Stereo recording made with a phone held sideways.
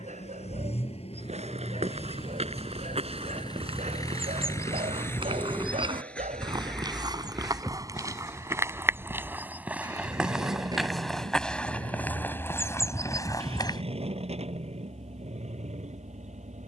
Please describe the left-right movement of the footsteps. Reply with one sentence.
In this clip you hear the footsteps travel towards the left.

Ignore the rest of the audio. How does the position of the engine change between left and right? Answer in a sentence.
In this clip you hear the engine go from the left side to the right.